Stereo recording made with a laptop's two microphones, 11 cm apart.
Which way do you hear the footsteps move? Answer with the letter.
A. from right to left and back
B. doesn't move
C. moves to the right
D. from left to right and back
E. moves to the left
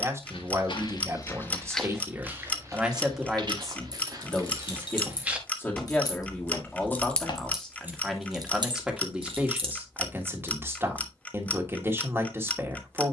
D.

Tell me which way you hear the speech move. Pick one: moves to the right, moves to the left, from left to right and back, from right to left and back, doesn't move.
from right to left and back.